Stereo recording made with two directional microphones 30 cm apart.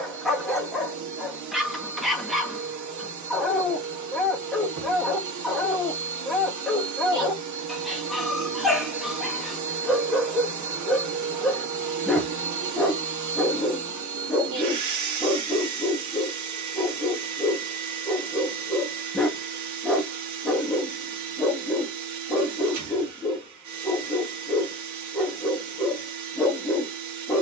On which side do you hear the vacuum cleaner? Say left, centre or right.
right.